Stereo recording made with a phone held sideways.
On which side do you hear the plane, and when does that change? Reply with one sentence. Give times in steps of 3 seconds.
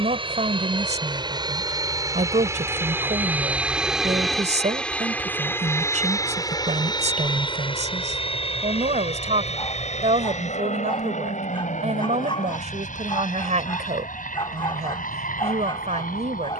You can hear the plane on the right from 0 s, in the centre from 3 s and on the left from 6 s.